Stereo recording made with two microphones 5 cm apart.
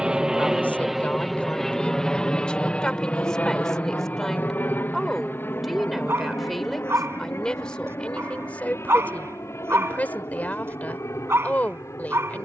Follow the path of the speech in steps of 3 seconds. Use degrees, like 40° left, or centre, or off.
20° left, centre, 10° left, 30° left.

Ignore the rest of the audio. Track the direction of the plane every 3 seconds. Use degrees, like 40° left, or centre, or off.
centre, 40° left, 50° left, 60° left.